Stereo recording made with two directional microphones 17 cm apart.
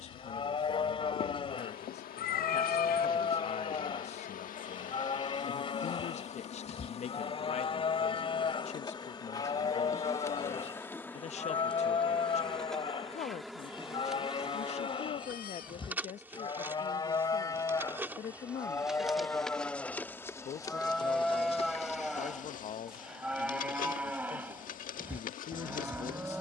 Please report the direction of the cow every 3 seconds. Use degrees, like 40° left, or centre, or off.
30° left, 30° left, 30° left, 30° left, 30° left, 30° left, 10° left, centre, 10° right.